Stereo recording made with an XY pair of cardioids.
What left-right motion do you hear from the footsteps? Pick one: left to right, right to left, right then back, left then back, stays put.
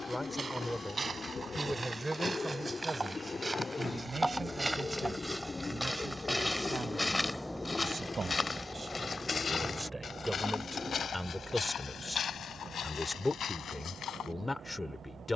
right to left.